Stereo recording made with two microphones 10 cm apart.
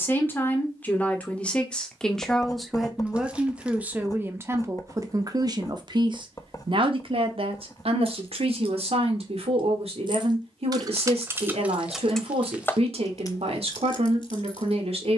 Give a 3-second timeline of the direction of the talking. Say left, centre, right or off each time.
centre, right, right, right, right.